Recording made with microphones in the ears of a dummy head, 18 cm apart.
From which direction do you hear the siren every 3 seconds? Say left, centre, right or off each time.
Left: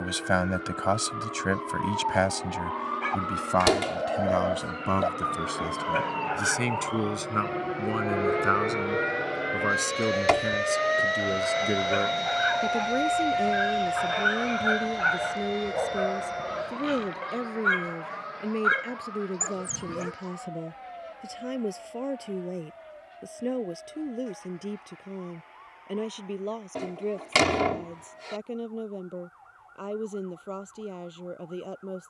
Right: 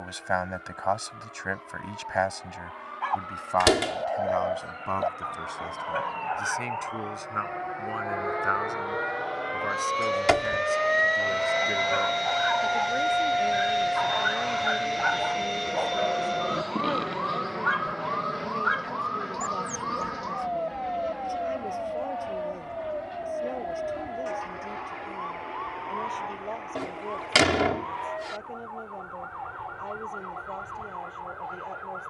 left, left, left, centre, right, right, right, right, right, right, right.